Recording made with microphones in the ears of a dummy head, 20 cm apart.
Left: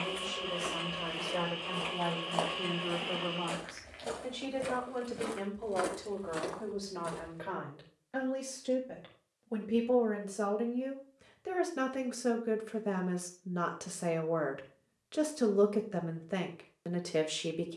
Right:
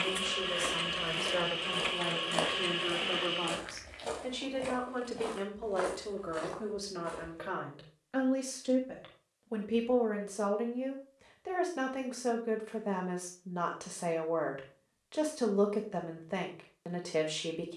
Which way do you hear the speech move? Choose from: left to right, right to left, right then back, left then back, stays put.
right to left.